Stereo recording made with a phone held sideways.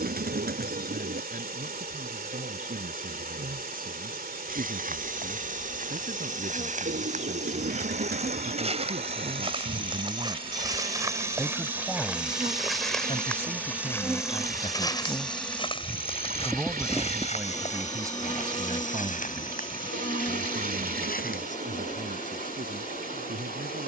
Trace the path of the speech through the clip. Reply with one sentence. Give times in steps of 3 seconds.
In this clip you hear the speech on the right from 0 s, on the left from 12 s, in the centre from 15 s and on the right from 18 s.